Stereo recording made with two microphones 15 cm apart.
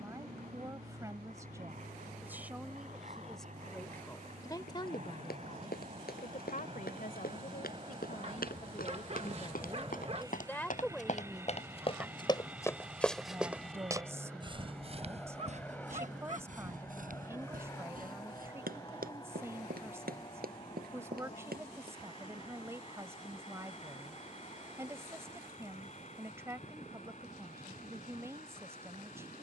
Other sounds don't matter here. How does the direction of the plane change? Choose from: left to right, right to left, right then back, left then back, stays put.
right to left.